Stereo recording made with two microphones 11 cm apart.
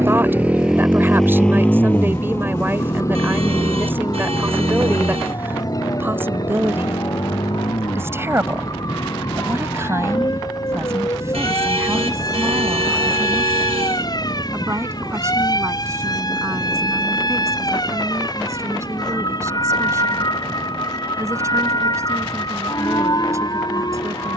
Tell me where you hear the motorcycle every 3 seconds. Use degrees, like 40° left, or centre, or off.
10° left, 40° left, 50° left, 50° left, 50° left, 50° left, 60° left, 60° left.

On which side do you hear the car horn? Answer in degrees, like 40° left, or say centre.
80° right.